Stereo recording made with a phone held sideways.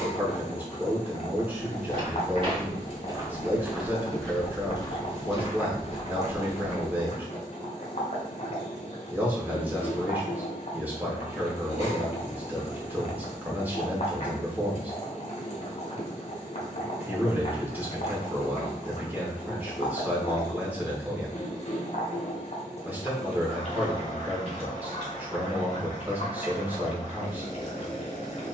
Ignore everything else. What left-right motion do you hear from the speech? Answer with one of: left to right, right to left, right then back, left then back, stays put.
stays put.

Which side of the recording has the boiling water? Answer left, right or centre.
left.